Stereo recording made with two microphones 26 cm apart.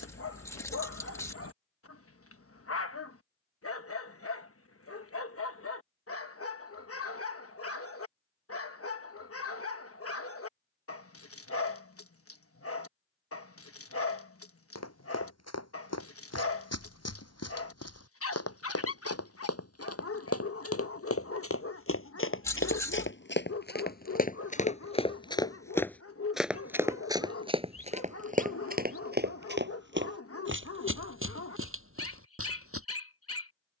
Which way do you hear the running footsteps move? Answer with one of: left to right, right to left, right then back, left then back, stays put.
left to right.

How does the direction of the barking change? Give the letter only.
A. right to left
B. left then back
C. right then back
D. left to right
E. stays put
E.